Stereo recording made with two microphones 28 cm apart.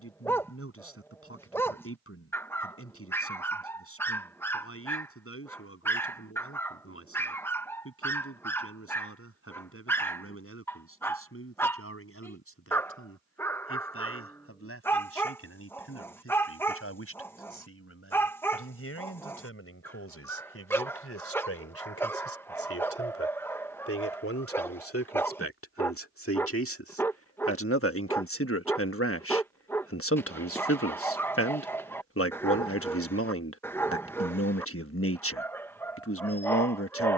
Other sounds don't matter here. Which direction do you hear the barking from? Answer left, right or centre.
centre.